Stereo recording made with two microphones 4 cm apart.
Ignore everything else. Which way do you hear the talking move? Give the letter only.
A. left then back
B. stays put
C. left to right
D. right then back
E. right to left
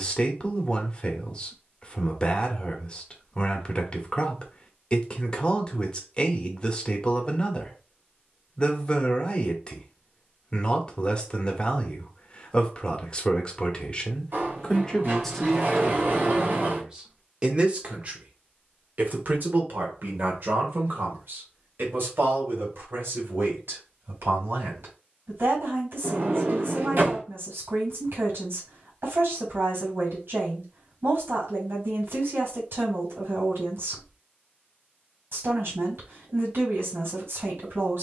C.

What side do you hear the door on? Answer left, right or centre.
right.